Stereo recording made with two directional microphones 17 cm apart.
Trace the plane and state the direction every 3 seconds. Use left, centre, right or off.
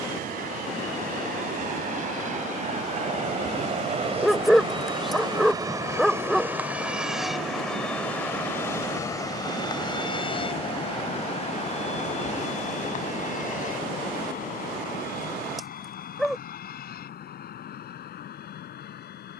right, right, centre, left, left, left, left.